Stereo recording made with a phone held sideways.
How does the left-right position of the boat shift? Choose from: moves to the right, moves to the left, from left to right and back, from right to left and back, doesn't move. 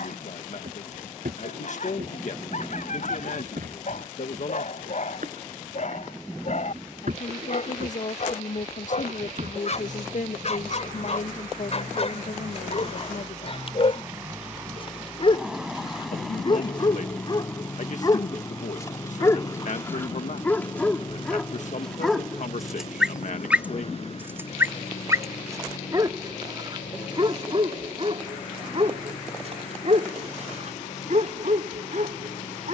moves to the left.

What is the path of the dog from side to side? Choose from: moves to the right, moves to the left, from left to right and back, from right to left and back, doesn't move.
moves to the right.